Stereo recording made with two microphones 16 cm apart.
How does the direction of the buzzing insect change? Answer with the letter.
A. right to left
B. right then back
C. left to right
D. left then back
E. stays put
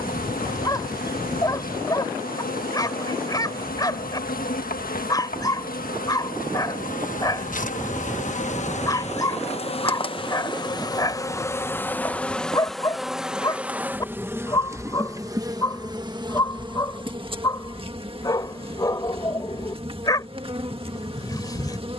C.